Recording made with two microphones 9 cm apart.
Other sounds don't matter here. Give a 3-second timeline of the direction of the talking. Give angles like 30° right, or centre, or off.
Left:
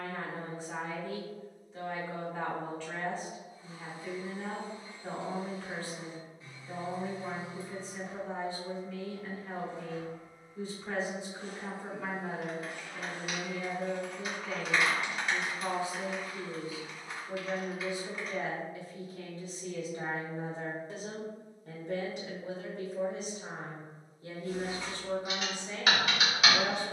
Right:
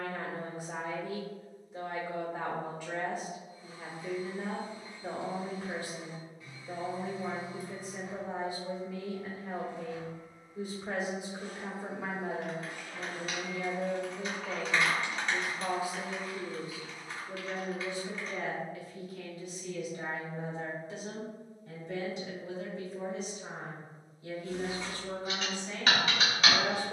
10° right, 10° right, 10° right, 10° right, 10° right, centre, 30° left, 50° left, 20° left.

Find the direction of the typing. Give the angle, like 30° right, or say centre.
10° left.